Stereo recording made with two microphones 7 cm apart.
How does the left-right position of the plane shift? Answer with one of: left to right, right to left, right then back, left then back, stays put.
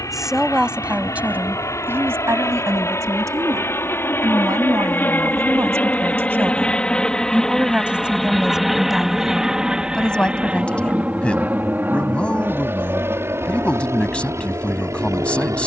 left to right.